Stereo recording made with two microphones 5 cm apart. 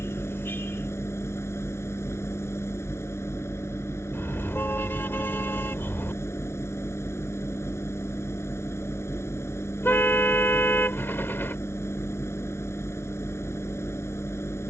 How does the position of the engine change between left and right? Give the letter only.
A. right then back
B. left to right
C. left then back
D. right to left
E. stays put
E.